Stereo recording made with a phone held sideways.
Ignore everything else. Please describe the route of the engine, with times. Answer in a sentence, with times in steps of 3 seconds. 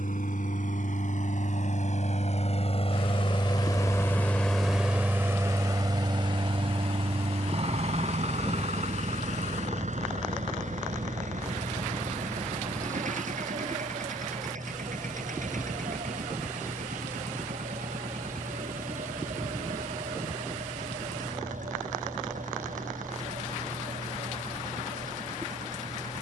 You can hear the engine on the left from 0 s, in the centre from 3 s and on the right from 6 s.